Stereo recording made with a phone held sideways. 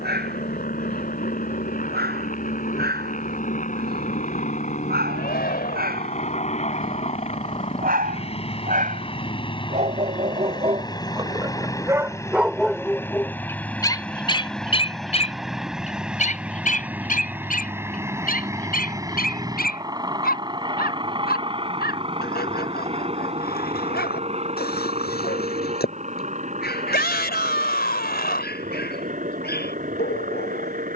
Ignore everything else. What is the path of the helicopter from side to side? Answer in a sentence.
In this clip you hear the helicopter move from left to right.